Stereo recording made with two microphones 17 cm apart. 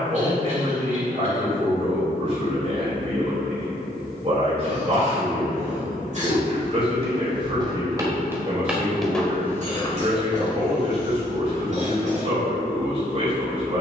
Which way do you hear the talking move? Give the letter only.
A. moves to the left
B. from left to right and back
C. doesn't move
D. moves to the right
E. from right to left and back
C.